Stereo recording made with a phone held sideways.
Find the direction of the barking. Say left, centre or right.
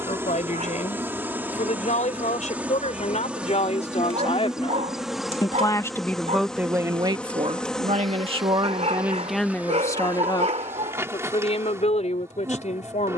right.